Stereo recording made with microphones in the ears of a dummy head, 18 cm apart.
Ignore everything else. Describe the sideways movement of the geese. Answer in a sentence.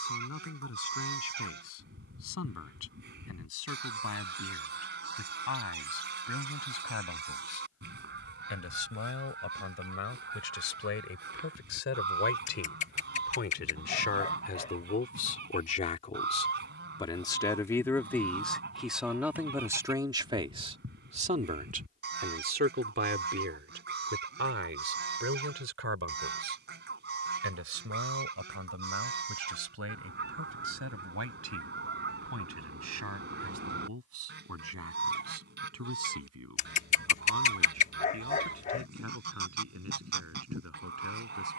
You can hear the geese stay in one place.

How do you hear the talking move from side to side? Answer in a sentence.
You can hear the talking move from left to right.